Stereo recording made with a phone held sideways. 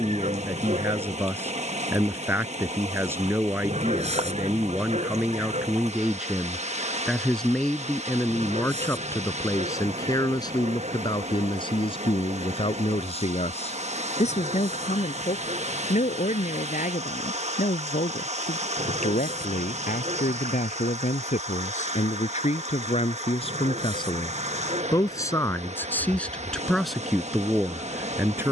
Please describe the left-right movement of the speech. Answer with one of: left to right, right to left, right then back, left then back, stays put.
left then back.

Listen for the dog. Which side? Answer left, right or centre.
right.